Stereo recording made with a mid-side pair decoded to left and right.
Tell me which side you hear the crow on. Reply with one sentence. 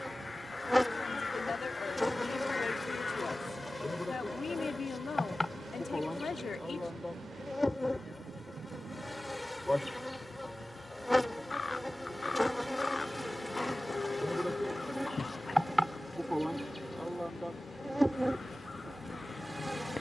You can hear the crow on the left.